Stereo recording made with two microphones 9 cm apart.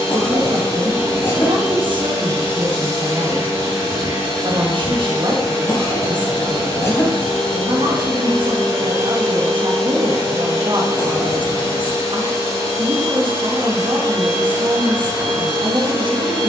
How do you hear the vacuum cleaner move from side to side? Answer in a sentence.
In this clip you hear the vacuum cleaner stay put.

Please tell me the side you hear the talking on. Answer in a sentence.
You can hear the talking on the right.